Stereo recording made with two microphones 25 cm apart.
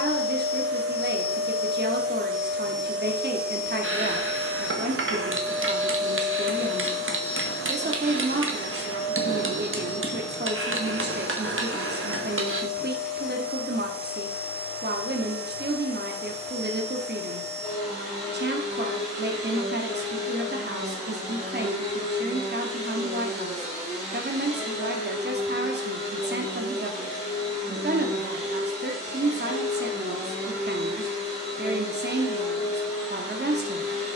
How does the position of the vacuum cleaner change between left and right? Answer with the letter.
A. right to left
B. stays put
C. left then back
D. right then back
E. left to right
A.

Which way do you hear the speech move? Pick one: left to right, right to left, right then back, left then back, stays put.
stays put.